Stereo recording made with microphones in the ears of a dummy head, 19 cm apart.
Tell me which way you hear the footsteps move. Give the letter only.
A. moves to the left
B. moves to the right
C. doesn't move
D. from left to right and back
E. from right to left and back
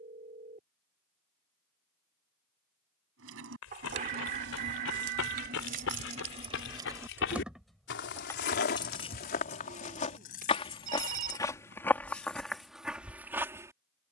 B.